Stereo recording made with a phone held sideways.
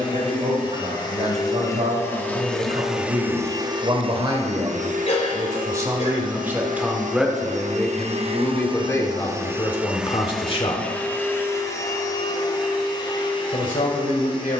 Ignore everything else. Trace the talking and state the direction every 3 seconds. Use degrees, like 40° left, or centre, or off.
50° right, 30° right, centre, 30° left, 70° left.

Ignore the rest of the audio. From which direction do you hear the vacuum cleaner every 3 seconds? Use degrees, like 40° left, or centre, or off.
20° left, 50° right, 60° right, centre, 30° left.